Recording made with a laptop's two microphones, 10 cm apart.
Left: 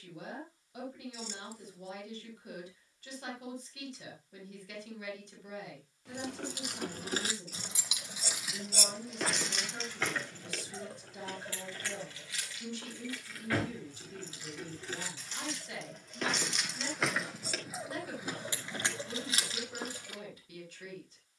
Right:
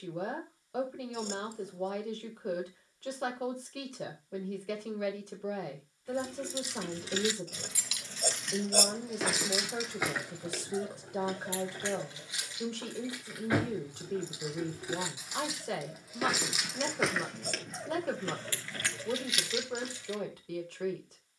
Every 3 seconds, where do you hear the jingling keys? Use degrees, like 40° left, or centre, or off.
off, off, 30° left, 10° right, 20° right, centre, 30° left.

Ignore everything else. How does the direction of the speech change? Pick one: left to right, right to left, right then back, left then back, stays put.
stays put.